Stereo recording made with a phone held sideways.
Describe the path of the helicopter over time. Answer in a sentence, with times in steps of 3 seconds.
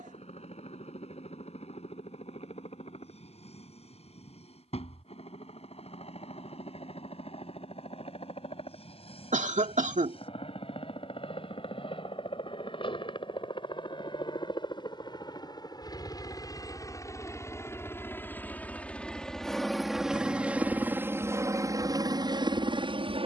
You can hear the helicopter on the left from 0 s, in the centre from 18 s and on the right from 21 s.